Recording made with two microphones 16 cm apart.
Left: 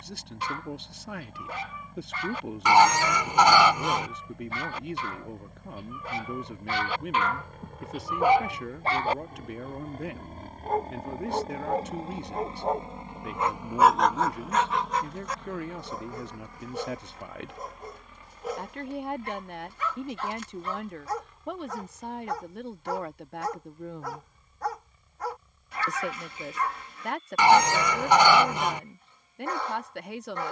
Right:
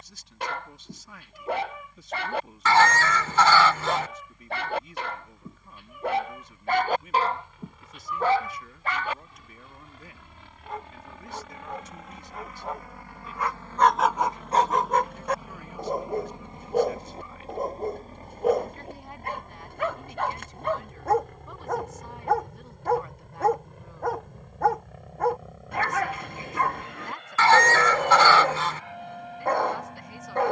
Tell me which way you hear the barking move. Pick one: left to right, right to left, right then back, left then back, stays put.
left then back.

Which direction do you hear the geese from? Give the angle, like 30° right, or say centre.
20° left.